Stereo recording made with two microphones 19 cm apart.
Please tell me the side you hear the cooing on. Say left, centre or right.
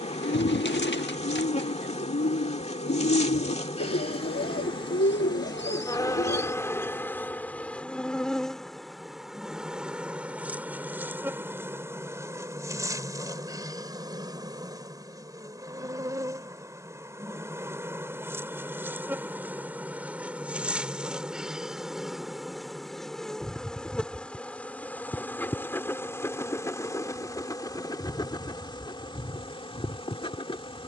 left.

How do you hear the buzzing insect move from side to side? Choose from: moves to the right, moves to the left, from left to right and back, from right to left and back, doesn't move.
from left to right and back.